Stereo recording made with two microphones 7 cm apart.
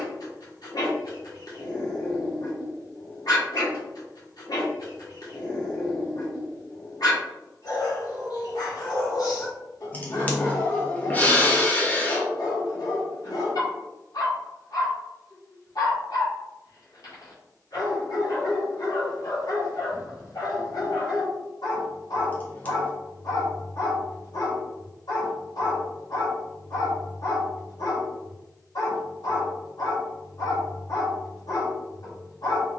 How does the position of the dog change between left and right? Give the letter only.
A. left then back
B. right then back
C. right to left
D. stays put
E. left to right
D.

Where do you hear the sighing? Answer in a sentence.
You can hear the sighing on the left.